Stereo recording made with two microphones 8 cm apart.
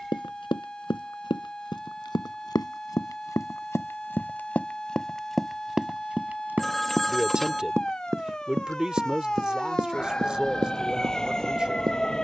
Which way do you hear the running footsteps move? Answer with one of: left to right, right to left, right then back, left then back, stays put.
left to right.